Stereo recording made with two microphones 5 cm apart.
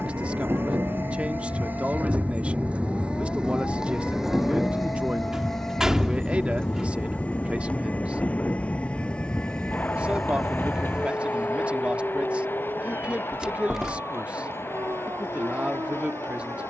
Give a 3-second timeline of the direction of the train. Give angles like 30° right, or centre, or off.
40° right, centre, 20° left, 40° left, 50° left, 50° left.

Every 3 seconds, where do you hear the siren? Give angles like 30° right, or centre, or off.
60° left, 50° left, 40° left, 10° right, 50° right, 70° right.